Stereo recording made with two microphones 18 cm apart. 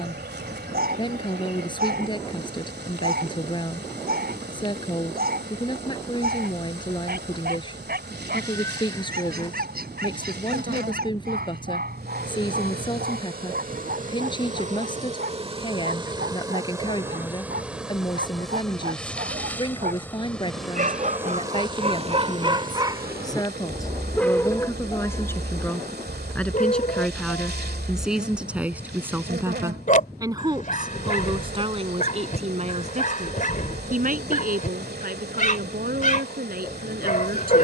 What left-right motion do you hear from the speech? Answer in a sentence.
You can hear the speech travel towards the right.